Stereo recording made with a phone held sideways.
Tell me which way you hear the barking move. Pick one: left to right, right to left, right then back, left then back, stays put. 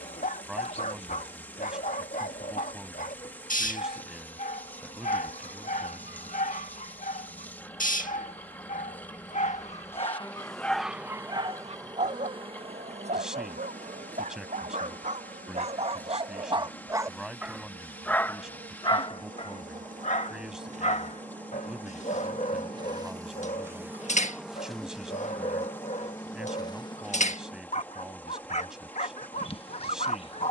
right then back.